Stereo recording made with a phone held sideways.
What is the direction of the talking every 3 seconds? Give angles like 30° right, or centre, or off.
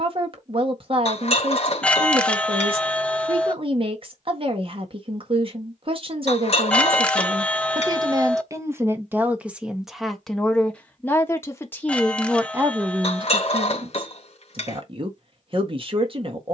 40° right, 40° right, 30° right, centre, 30° right, 40° right.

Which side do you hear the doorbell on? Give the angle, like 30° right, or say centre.
10° left.